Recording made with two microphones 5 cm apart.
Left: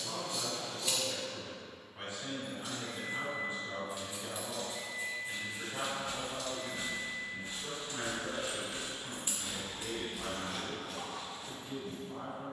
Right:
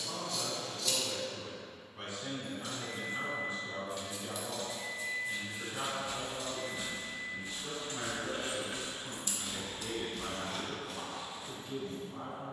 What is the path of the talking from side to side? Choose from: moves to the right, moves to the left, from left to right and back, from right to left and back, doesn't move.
doesn't move.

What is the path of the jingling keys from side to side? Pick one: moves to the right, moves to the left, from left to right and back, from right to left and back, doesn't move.
from left to right and back.